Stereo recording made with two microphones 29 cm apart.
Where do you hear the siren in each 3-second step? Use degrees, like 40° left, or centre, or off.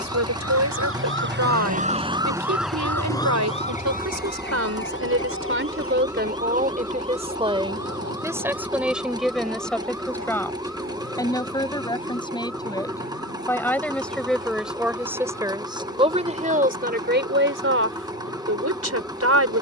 30° right, 30° left, 60° left, 60° left, 70° left, 70° left, 70° left.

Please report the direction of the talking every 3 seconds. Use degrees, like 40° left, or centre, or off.
70° right, 60° right, 20° right, 10° left, 10° left, 30° right, 60° right.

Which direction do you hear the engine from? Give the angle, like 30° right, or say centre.
10° right.